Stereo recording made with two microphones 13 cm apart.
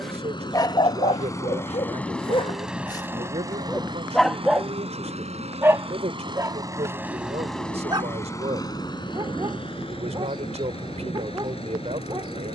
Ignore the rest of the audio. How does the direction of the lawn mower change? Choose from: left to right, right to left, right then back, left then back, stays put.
right then back.